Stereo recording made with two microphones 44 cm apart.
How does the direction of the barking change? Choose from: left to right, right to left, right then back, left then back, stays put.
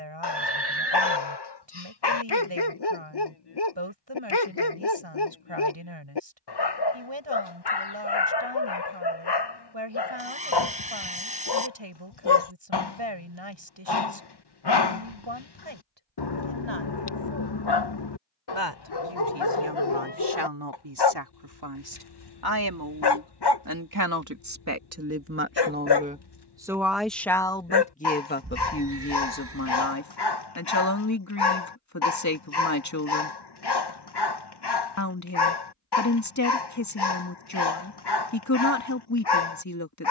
stays put.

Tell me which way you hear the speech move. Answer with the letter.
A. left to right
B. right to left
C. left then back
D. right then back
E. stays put
B.